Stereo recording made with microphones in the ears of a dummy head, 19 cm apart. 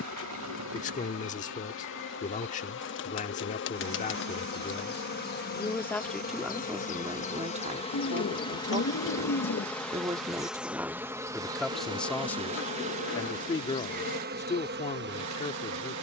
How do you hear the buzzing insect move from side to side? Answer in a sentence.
In this clip you hear the buzzing insect go from the left side to the right.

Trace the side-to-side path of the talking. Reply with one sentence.
You can hear the talking move from left to right and back again.